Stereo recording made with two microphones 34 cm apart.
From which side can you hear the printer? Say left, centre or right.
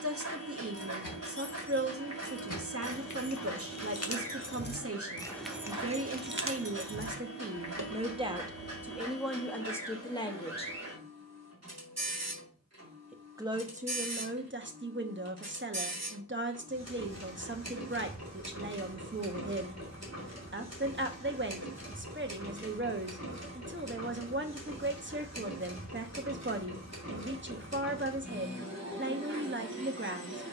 right.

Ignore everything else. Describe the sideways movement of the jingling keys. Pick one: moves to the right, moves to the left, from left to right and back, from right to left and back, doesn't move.
moves to the right.